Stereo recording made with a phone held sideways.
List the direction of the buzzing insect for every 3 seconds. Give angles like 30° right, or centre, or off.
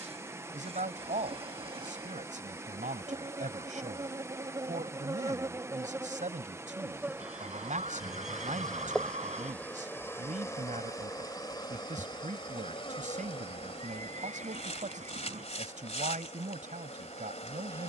40° right, 30° right, 10° right, 20° left, 40° left, 40° left.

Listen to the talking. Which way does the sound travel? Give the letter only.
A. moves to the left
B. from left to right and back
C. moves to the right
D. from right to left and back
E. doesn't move
E.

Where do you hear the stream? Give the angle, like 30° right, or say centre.
20° right.